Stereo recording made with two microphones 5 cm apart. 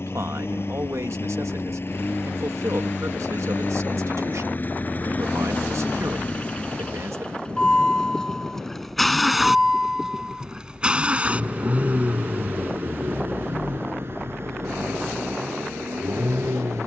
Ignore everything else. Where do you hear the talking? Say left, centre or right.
right.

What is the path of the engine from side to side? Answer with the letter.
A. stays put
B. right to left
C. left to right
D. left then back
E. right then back
C.